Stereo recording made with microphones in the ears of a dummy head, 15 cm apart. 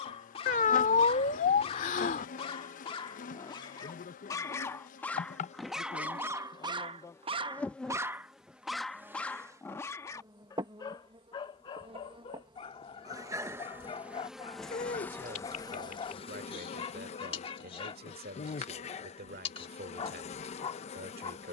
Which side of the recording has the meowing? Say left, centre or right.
left.